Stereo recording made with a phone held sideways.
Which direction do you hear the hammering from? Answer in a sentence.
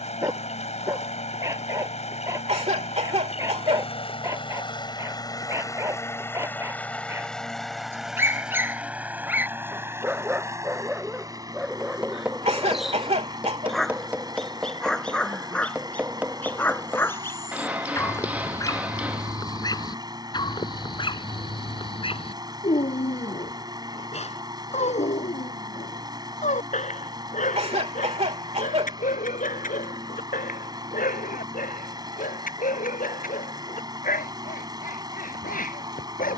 In this clip you hear the hammering in the centre.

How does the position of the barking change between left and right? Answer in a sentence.
In this clip you hear the barking move from right to left.